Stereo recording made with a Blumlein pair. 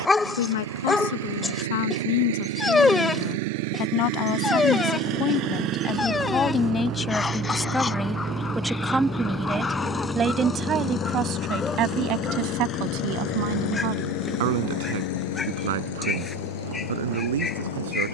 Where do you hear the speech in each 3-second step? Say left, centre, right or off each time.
left, left, centre, right, right, right.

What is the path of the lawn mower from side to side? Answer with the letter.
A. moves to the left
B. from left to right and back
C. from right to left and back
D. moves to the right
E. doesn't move
A.